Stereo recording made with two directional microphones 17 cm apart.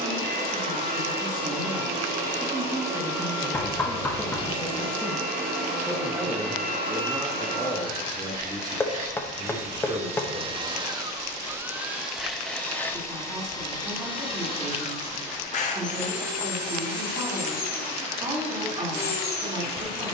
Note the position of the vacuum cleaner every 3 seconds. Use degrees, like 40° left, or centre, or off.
60° right, 60° right, 60° right, 30° right, 20° left, 50° left, 60° left.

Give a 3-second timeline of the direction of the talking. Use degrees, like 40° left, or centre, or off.
20° right, centre, 10° right, 30° right, 30° right, 30° right, 30° right.